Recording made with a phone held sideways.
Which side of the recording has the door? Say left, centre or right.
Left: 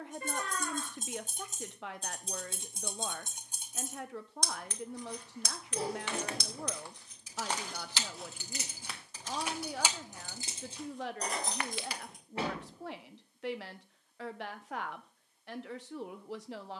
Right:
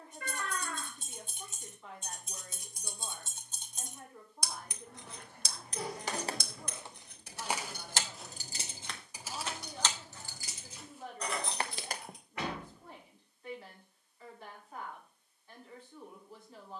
left.